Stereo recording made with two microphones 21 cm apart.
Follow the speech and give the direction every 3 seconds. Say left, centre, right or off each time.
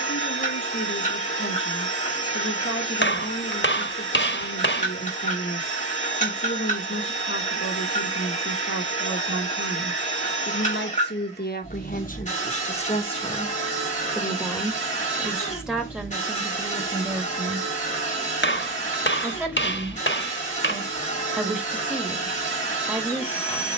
left, left, left, left, left, centre, centre, centre.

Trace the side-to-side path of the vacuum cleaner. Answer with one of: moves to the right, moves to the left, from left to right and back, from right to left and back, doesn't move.
doesn't move.